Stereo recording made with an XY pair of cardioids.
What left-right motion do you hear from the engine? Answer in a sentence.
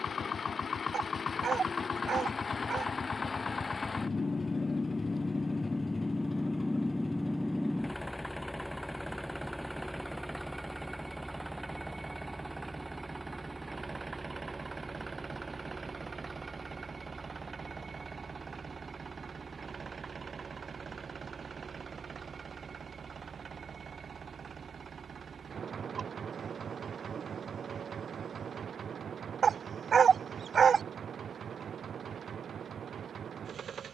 In this clip you hear the engine go from the left side to the right.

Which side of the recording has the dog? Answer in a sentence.
In this clip you hear the dog on the right.